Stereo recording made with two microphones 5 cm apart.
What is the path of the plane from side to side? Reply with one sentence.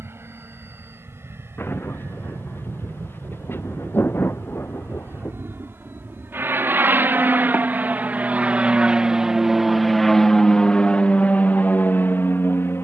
In this clip you hear the plane go from the right side to the left.